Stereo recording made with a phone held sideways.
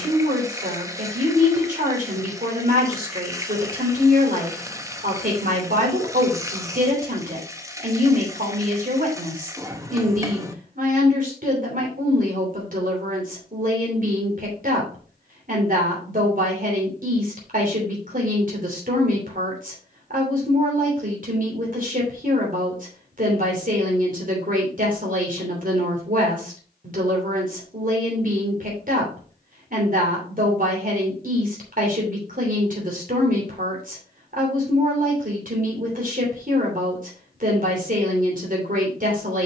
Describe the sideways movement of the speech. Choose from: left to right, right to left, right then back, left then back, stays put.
stays put.